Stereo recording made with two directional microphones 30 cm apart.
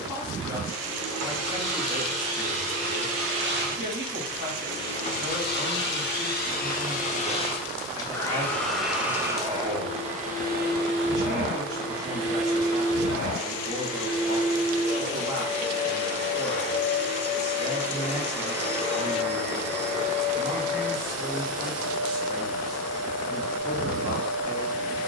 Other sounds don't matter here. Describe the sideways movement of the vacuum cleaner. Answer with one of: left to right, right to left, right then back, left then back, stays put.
left then back.